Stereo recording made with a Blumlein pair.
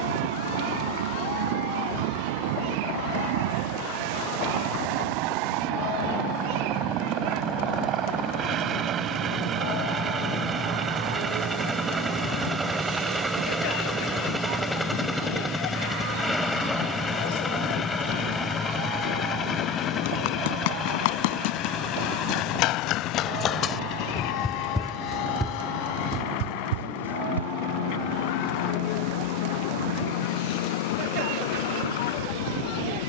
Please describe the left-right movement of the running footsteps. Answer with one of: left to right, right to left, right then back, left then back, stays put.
left to right.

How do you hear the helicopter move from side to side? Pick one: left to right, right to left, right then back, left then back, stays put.
right to left.